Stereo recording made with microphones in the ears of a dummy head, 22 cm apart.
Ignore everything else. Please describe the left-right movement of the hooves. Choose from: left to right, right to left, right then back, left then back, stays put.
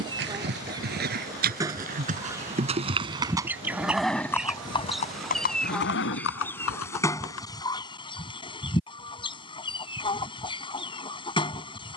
right to left.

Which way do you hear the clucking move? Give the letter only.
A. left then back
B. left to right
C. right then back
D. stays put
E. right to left
E.